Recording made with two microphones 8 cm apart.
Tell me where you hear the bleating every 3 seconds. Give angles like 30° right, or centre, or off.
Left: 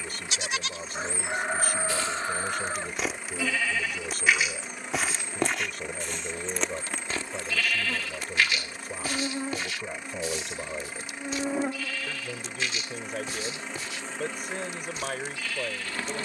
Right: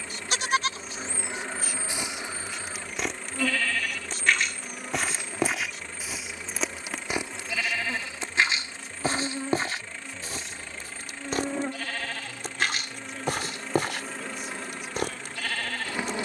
20° right, centre, 20° right, 50° right, 60° right, 60° right.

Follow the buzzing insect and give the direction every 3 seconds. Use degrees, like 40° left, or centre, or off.
20° right, 10° right, centre, 10° left, centre, 20° right.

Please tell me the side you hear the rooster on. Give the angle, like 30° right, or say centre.
40° left.